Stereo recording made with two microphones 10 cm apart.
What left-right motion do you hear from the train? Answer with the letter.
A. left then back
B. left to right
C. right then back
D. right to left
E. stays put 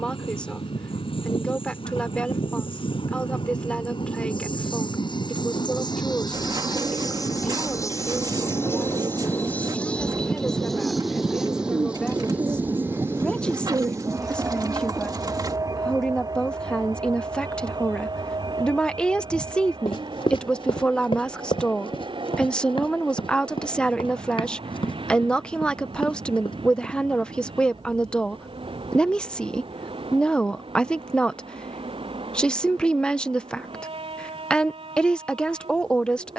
B.